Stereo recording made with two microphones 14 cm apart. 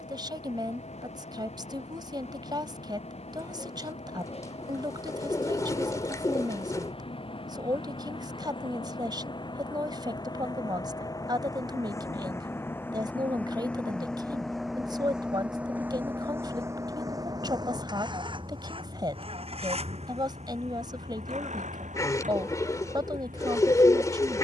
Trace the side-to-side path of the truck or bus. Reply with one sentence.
In this clip you hear the truck or bus move from left to right.